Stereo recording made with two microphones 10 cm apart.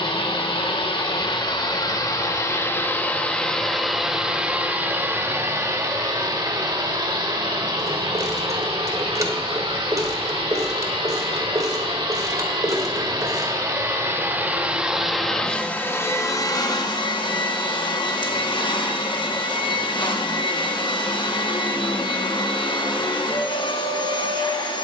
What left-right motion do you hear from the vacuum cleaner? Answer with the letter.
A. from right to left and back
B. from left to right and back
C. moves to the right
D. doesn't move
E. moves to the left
B.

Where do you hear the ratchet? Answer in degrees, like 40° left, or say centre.
30° right.